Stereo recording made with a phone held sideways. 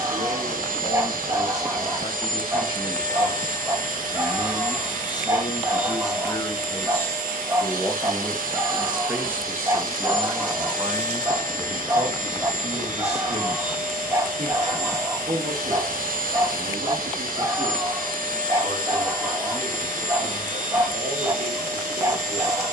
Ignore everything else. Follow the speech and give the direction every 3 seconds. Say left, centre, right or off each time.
left, left, centre, right, right, right, right, right.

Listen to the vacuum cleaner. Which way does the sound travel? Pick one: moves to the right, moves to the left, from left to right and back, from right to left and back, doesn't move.
doesn't move.